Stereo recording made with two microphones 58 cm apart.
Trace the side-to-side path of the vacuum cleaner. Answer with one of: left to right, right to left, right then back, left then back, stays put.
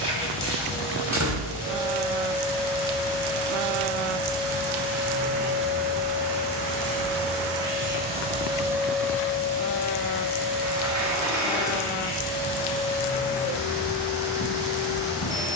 right to left.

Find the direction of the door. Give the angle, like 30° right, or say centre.
30° right.